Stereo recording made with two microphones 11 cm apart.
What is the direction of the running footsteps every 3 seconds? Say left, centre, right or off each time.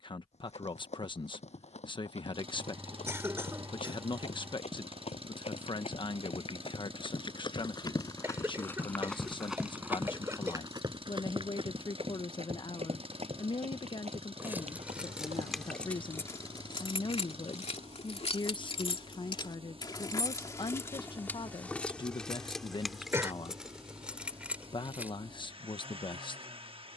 left, left, left, right, right, right, off, off, off.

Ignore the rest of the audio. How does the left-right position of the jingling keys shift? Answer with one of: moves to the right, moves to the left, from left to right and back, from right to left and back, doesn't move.
from right to left and back.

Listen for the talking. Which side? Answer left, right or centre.
left.